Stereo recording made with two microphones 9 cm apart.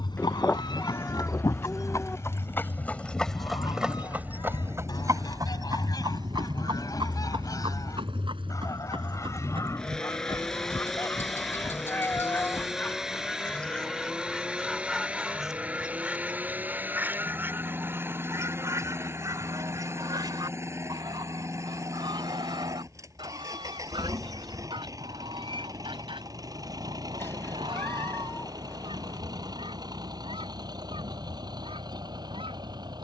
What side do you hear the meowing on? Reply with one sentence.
You can hear the meowing on the left.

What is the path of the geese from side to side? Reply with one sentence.
You can hear the geese move to the right.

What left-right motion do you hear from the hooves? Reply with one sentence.
In this clip you hear the hooves travel towards the right.